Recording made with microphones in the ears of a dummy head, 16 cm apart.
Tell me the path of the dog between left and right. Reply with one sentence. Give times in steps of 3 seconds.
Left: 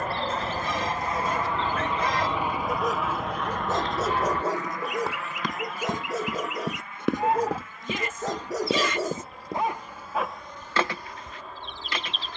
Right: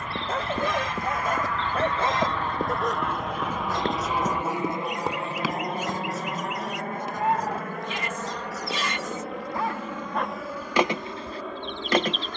You can hear the dog on the right from 0 s, on the left from 3 s and in the centre from 9 s.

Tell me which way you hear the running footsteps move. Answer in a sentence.
You can hear the running footsteps go from the right side to the left.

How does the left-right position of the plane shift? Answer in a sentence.
In this clip you hear the plane go from the left side to the right.